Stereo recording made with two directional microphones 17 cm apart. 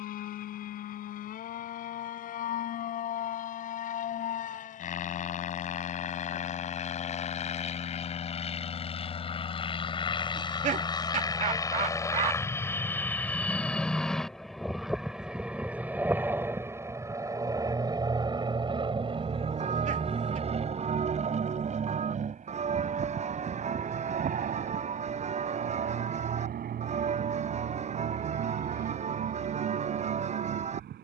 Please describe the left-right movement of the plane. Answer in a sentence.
You can hear the plane travel towards the right.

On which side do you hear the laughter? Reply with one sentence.
You can hear the laughter on the right.